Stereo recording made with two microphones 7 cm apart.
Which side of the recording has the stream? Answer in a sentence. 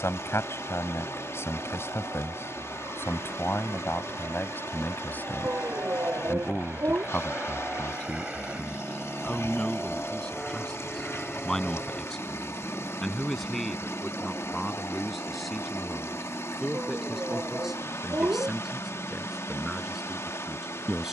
In this clip you hear the stream on the left.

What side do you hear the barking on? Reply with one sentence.
You can hear the barking on the right.